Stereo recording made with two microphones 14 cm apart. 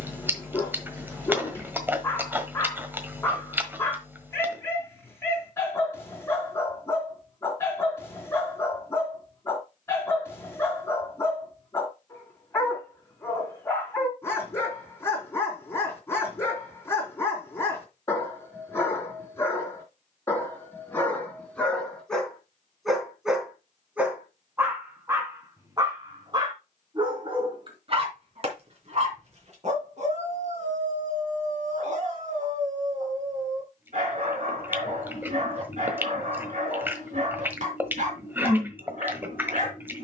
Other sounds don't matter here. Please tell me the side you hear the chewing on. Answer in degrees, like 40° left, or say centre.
10° right.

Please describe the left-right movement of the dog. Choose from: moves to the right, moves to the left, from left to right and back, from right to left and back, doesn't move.
moves to the right.